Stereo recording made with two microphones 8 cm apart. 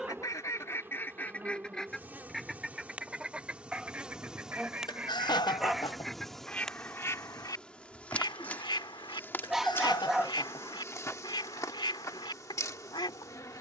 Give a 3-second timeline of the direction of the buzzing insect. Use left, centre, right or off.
right, centre, centre, left, left.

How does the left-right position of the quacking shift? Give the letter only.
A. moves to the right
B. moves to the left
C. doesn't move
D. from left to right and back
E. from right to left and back
D.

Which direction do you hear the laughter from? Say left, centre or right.
left.